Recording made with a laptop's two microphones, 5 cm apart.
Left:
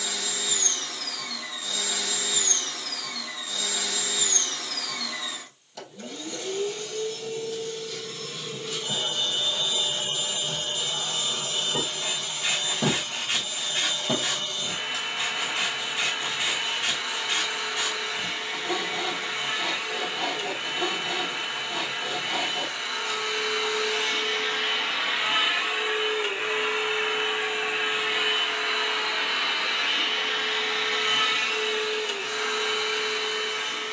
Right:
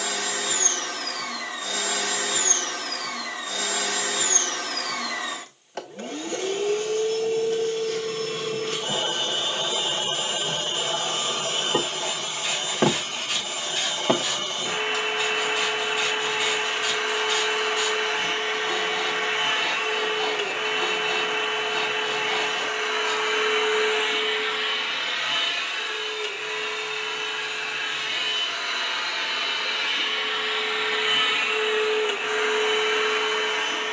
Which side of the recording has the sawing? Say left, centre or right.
left.